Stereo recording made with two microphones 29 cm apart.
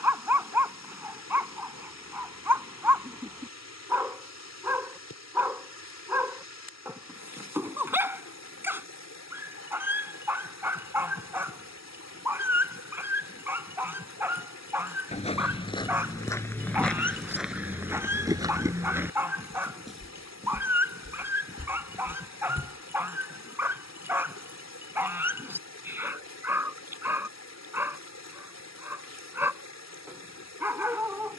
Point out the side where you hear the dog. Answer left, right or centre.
centre.